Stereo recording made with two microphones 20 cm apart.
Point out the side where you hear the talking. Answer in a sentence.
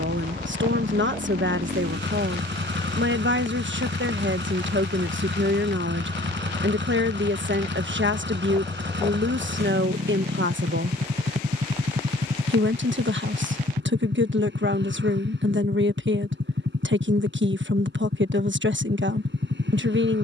In this clip you hear the talking on the right.